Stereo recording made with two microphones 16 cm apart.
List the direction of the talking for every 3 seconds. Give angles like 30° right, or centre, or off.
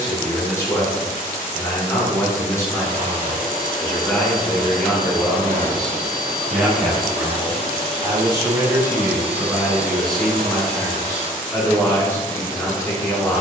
20° left, 10° left, 10° right, 10° left, 20° left.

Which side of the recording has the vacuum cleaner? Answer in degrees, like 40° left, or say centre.
80° right.